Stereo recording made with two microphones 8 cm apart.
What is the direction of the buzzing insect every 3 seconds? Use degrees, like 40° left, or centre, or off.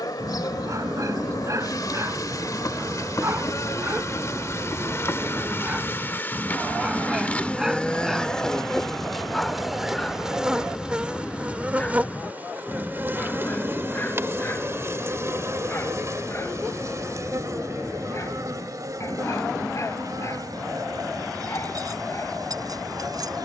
50° left, 40° left, 20° left, 10° right, 30° right, 40° right, 50° right, 60° right.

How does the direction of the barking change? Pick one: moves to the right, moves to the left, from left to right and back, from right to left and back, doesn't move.
moves to the left.